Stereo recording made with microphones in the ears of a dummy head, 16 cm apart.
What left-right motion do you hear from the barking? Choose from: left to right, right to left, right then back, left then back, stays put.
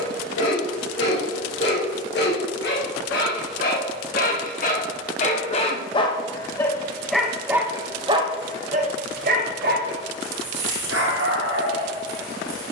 left to right.